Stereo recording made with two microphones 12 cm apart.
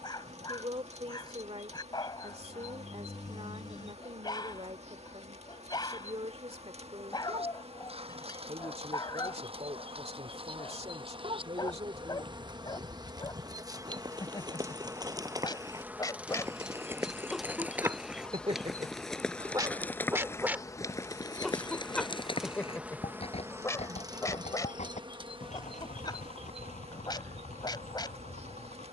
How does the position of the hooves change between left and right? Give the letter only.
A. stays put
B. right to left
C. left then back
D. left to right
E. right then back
B.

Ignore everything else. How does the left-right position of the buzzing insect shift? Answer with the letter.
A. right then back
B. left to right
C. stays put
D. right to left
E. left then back
E.